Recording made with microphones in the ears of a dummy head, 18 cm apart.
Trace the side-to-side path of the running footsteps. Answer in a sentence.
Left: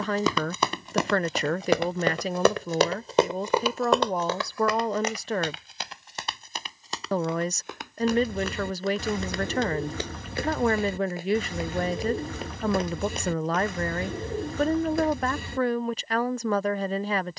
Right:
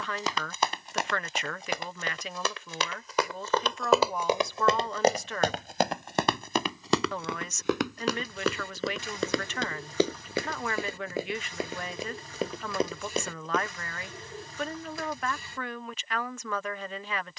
In this clip you hear the running footsteps go from the left side to the right.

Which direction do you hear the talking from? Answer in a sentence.
In this clip you hear the talking on the left.